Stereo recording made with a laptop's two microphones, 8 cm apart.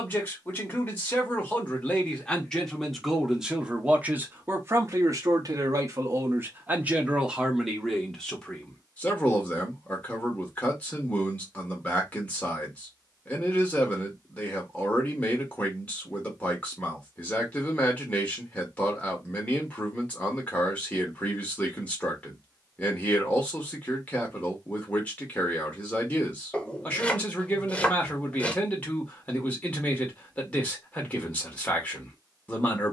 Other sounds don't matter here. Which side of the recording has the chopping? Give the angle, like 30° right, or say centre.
20° left.